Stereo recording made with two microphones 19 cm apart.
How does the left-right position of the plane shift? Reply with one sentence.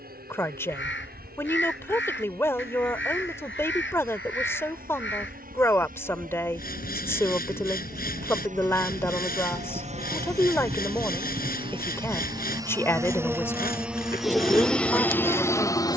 You can hear the plane go from the right side to the left.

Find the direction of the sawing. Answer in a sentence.
In this clip you hear the sawing on the left.